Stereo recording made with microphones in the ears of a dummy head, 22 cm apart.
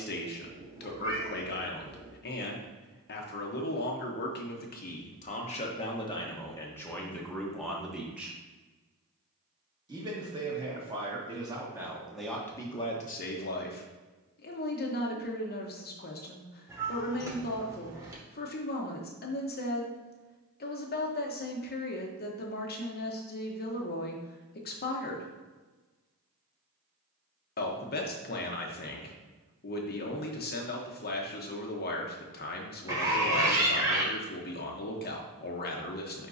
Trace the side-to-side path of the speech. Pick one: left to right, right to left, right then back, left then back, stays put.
right then back.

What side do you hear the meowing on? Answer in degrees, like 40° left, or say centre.
10° right.